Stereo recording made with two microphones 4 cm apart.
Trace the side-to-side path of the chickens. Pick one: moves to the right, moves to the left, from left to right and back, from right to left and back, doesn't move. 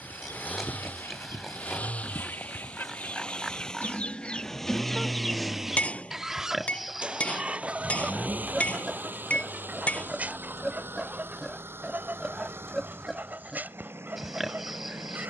moves to the right.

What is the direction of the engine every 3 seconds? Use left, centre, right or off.
left, centre, right, right, right.